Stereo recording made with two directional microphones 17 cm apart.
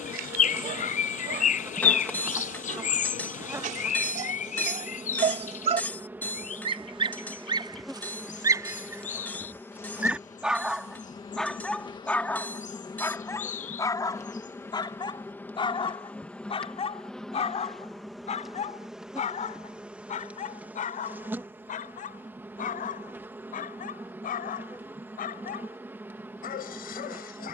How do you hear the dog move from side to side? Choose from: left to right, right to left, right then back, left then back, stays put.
right to left.